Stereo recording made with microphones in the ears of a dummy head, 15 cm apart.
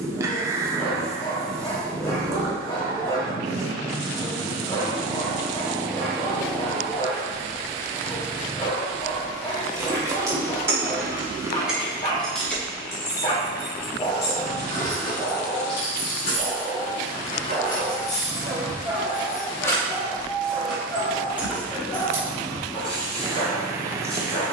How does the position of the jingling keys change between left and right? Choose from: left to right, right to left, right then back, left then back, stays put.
left then back.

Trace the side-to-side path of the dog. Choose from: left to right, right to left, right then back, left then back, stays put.
right then back.